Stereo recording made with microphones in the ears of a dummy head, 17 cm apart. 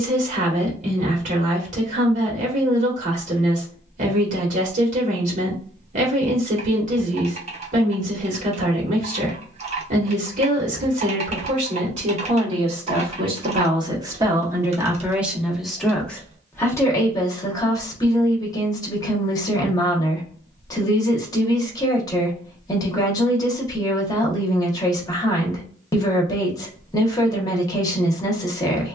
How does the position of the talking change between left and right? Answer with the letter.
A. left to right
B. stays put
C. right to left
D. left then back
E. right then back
C.